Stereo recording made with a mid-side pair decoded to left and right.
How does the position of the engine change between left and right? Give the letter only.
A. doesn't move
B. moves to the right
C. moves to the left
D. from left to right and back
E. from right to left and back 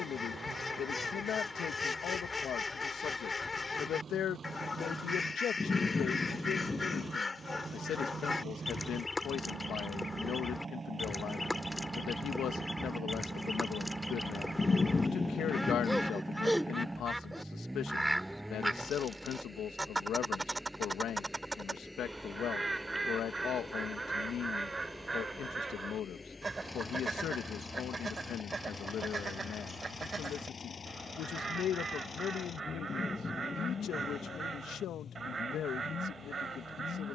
C.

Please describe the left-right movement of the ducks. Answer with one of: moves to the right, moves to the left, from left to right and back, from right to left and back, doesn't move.
moves to the right.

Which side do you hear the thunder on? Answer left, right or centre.
left.